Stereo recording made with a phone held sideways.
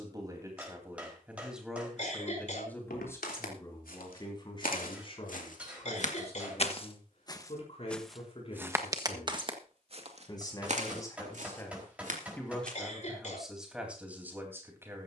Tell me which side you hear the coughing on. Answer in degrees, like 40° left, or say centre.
50° left.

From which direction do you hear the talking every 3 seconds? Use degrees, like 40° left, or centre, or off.
10° right, 30° left, 40° left, 20° left, 10° right.